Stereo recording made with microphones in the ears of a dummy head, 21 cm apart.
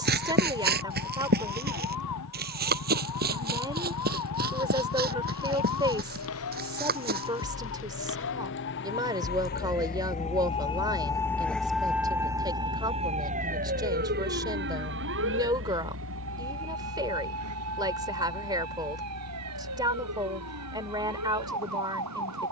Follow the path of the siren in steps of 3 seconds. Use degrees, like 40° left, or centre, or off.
80° left, 70° left, 60° left, 20° left, 30° right, 60° right, 70° right, 70° right.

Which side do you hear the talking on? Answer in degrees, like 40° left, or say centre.
20° right.